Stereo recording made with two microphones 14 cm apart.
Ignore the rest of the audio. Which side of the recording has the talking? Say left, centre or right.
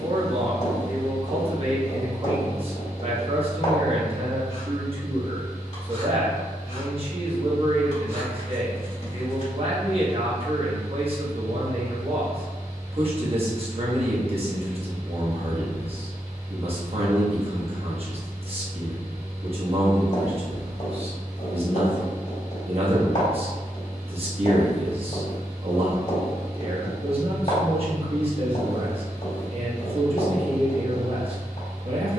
right.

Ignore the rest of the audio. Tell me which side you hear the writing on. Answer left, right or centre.
left.